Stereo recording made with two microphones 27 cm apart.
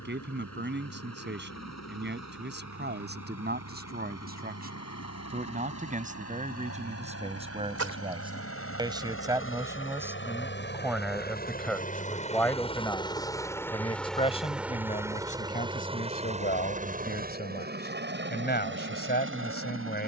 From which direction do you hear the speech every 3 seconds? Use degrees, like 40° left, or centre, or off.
40° right, 30° right, 20° right, 10° right, 10° left, 30° left, 40° left.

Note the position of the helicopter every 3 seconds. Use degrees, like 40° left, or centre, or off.
70° left, 70° left, 60° left, 40° left, 10° left, 20° right, 40° right.